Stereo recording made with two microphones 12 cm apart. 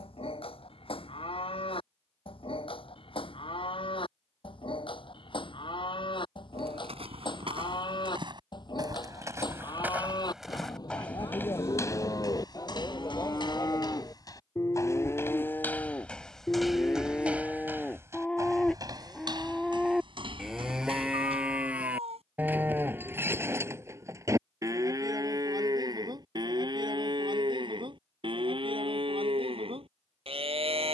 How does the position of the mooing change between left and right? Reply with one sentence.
In this clip you hear the mooing move to the right.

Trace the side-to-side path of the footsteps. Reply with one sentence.
You can hear the footsteps go left and come back.